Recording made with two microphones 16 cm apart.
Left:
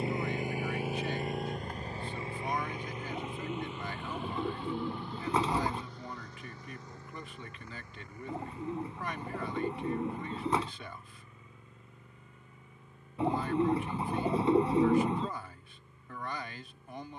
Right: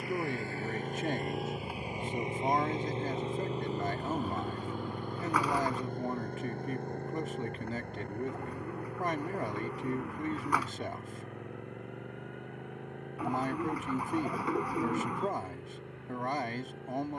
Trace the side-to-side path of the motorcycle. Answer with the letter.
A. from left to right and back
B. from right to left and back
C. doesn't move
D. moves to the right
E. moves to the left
D.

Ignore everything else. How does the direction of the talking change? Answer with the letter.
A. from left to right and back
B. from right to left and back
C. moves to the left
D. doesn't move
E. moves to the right
D.